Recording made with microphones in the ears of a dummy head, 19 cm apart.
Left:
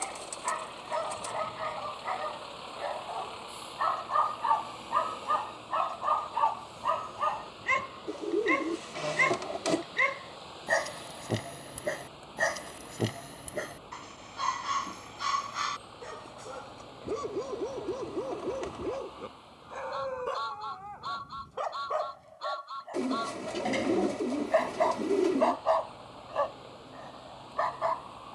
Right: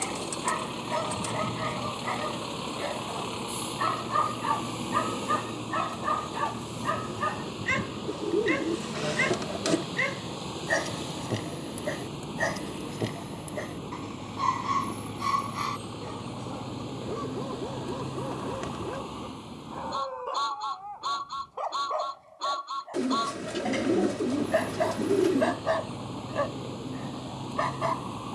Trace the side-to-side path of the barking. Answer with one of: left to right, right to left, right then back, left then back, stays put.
left then back.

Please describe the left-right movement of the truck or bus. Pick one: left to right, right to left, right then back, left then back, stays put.
stays put.